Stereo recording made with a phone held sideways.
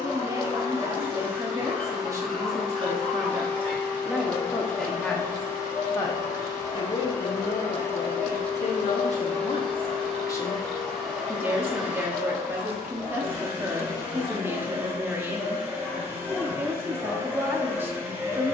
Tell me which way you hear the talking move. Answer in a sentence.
In this clip you hear the talking move from right to left and back again.